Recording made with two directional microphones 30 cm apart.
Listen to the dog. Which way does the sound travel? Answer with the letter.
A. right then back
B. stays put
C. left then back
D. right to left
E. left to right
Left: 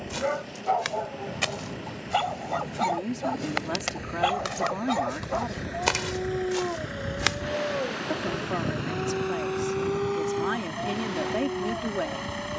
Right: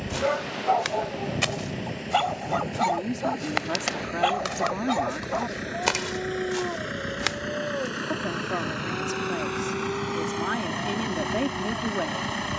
D.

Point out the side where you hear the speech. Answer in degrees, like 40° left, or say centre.
centre.